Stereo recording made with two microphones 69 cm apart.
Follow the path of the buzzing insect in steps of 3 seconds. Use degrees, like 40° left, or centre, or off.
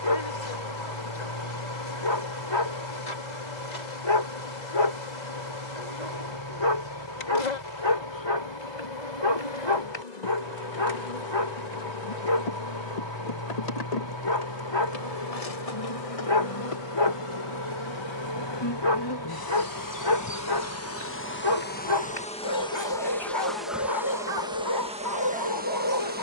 80° left, 80° left, 80° left, 70° left, 60° left, 50° left, 30° left, 10° left, 10° right.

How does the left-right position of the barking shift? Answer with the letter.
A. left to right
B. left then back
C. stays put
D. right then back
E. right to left
C.